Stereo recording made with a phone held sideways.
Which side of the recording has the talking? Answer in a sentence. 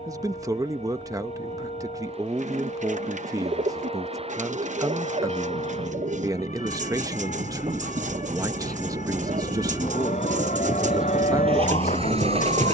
You can hear the talking on the right.